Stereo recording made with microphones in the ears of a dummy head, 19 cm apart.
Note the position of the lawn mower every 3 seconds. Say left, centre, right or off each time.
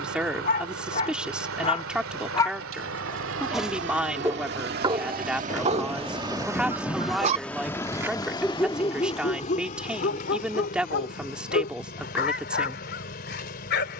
right, right, centre, left, left.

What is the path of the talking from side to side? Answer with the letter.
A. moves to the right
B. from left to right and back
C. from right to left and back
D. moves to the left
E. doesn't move
E.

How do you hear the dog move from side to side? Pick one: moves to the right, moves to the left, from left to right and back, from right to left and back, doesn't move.
from left to right and back.